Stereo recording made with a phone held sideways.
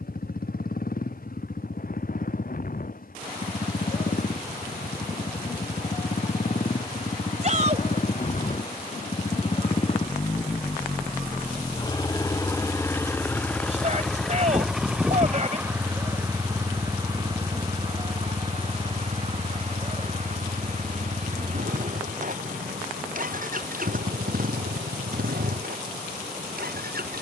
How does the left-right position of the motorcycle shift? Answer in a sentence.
You can hear the motorcycle go from the left side to the right.